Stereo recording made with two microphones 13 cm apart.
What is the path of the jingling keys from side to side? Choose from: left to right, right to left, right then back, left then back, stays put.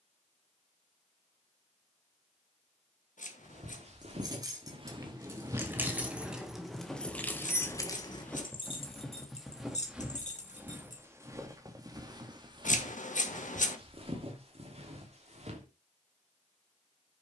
right to left.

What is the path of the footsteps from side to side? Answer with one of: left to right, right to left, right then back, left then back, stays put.
left then back.